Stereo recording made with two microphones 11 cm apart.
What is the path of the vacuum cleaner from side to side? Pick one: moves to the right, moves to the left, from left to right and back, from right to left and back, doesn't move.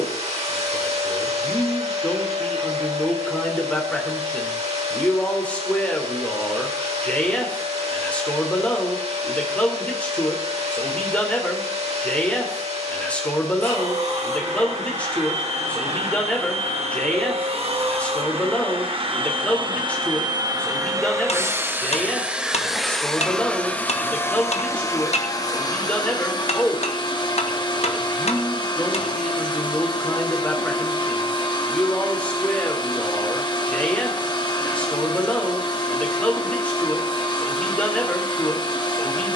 moves to the left.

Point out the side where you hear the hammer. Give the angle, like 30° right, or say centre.
80° left.